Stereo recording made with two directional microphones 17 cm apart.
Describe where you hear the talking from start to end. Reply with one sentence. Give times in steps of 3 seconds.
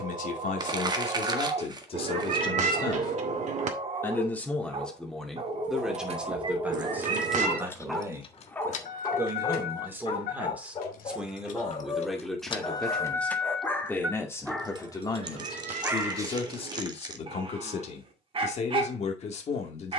You can hear the talking on the left from 0 s, in the centre from 3 s and on the left from 15 s.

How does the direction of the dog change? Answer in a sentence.
You can hear the dog go left and come back.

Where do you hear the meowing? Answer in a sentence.
You can hear the meowing on the right.